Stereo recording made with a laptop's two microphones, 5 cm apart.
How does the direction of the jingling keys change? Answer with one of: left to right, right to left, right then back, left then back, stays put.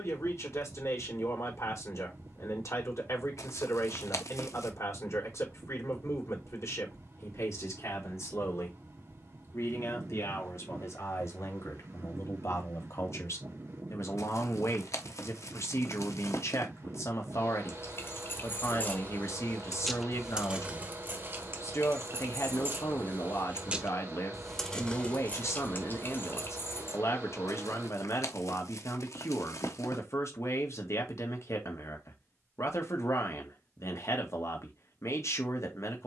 right then back.